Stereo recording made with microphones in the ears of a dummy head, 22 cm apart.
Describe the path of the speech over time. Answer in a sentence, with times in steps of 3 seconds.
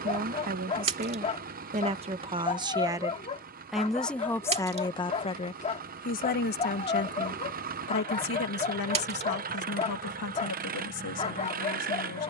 You can hear the speech on the right from 0 s, in the centre from 3 s and on the left from 6 s.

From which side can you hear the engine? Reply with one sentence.
You can hear the engine on the right.